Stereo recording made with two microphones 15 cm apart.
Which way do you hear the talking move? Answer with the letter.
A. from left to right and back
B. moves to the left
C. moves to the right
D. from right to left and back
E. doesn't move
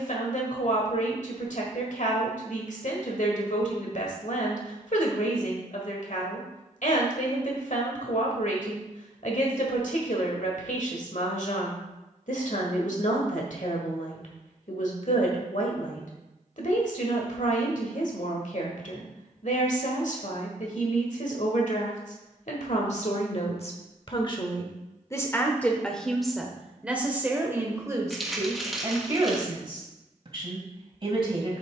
C.